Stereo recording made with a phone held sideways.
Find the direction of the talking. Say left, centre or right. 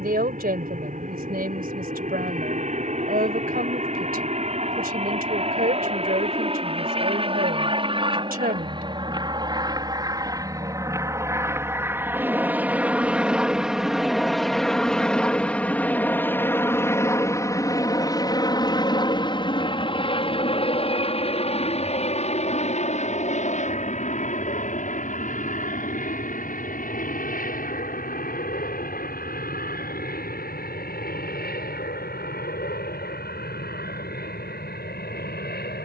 right.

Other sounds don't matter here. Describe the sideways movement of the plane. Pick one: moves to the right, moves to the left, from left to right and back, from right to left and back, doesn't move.
moves to the left.